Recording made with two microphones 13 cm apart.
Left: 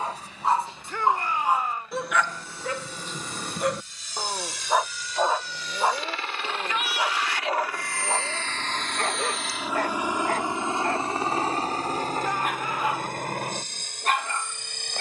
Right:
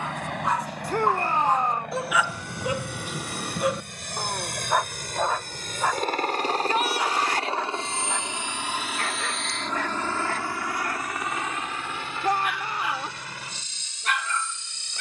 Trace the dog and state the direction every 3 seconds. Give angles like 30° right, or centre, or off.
10° left, centre, 30° left, 40° left, 40° left.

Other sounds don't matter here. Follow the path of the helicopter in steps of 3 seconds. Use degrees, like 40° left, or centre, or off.
70° right, 60° right, 30° right, 20° left, 50° left.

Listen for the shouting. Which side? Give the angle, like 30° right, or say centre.
40° right.